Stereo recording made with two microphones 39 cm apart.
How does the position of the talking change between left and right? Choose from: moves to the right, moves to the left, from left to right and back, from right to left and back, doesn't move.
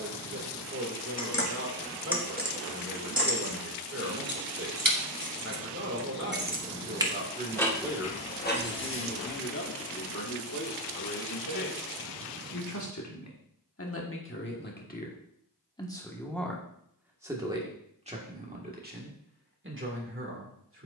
from right to left and back.